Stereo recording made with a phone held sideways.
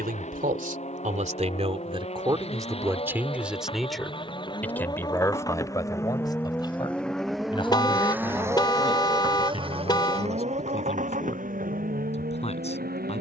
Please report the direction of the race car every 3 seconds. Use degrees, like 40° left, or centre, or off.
50° left, 30° left, centre, 40° right, 60° right.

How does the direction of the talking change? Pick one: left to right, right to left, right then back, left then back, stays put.
right to left.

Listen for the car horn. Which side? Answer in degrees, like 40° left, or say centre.
30° left.